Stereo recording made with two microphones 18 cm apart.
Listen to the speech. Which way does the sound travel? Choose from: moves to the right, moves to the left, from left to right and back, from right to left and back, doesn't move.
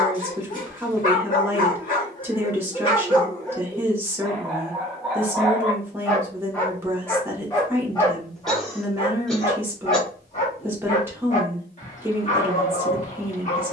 doesn't move.